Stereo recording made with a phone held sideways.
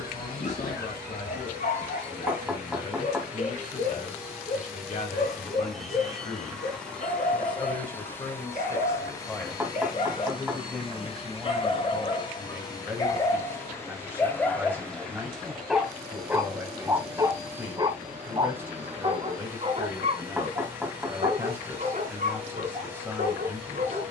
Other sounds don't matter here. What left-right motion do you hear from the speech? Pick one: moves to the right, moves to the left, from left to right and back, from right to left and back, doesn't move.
moves to the right.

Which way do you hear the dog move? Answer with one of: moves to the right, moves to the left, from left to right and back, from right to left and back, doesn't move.
moves to the right.